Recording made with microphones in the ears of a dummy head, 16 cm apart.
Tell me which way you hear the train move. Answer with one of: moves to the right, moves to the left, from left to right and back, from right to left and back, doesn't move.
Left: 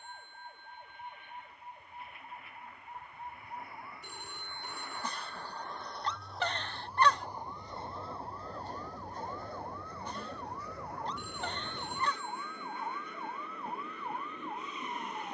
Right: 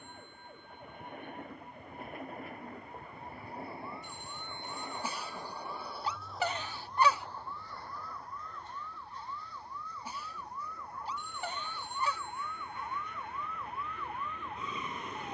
moves to the left.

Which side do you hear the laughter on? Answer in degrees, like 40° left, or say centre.
10° right.